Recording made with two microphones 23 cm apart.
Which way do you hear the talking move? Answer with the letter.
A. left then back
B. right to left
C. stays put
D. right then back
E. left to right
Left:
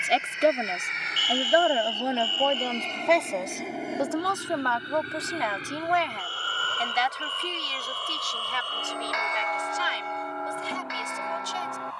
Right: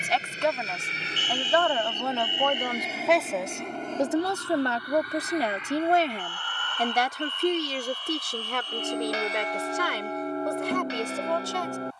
E.